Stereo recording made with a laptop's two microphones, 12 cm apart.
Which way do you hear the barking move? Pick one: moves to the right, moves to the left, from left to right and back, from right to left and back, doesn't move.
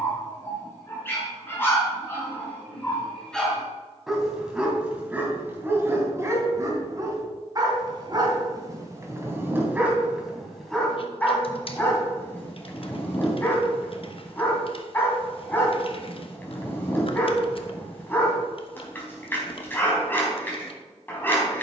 from left to right and back.